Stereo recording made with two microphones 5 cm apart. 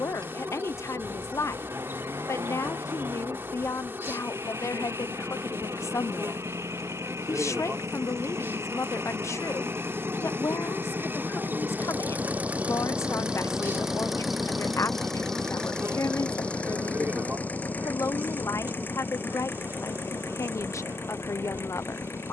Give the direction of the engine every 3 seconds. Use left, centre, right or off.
right, right, right, right, centre, left, left, left.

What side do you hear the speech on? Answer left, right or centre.
left.